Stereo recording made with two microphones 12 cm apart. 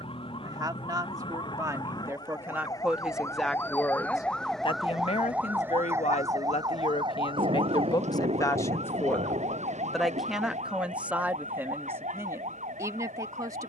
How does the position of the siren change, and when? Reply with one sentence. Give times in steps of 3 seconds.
In this clip you hear the siren on the left from 0 s, in the centre from 3 s and on the right from 6 s.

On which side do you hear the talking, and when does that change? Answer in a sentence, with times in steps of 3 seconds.
In this clip you hear the talking on the right from 0 s, on the left from 3 s, in the centre from 9 s and on the right from 12 s.